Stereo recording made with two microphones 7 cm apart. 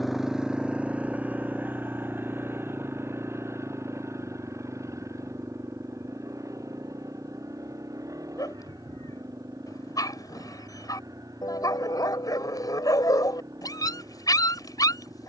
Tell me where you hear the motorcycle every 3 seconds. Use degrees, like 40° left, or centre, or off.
20° right, 40° right, 50° right, 50° right, 50° right.